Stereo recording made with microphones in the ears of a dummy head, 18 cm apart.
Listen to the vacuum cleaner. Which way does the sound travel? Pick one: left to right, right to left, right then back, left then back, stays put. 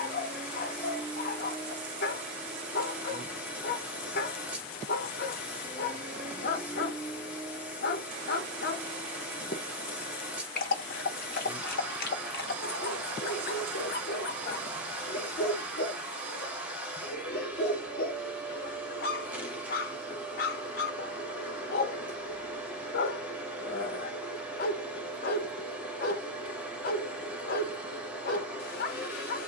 stays put.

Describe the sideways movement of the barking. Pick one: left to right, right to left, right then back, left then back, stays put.
stays put.